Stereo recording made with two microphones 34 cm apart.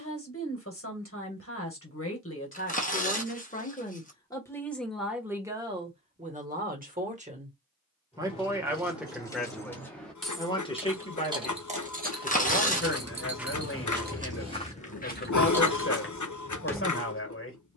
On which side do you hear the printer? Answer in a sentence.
In this clip you hear the printer on the left.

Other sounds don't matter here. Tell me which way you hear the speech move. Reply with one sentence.
In this clip you hear the speech go right and come back.